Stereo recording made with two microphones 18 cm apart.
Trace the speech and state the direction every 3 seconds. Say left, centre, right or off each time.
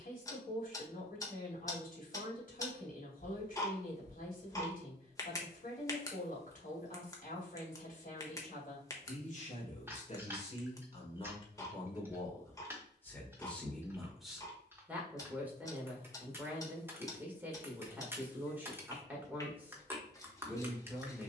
left, left, left, left, centre, centre, centre.